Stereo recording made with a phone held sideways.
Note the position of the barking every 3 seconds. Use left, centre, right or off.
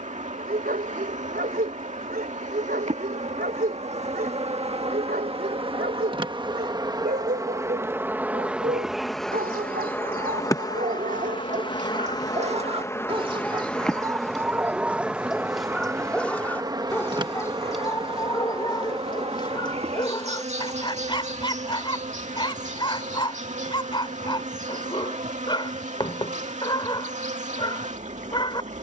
right, right, right, right, right, centre, left, left, left, left.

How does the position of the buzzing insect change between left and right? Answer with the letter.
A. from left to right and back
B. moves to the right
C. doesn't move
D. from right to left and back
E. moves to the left
D.